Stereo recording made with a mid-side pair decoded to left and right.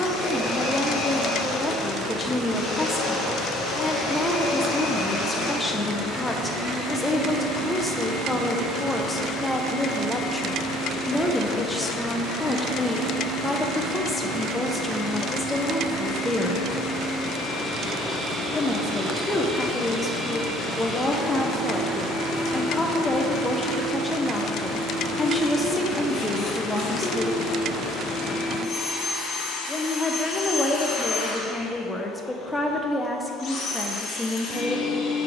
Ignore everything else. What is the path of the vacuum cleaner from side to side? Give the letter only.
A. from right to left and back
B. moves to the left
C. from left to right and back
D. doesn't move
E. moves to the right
C.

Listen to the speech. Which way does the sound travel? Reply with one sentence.
In this clip you hear the speech stay in one place.